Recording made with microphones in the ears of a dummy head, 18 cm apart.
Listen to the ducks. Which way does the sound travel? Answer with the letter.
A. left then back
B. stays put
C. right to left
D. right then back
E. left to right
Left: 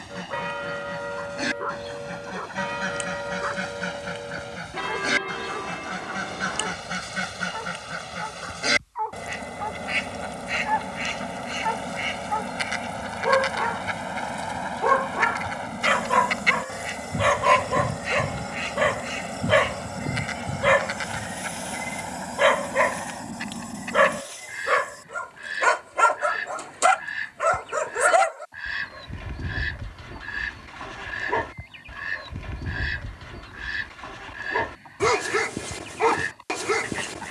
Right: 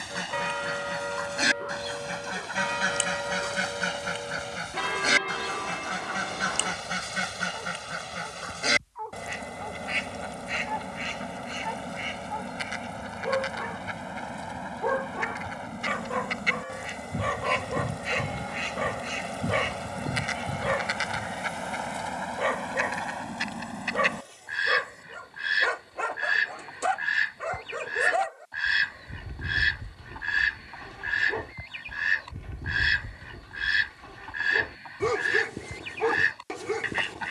A.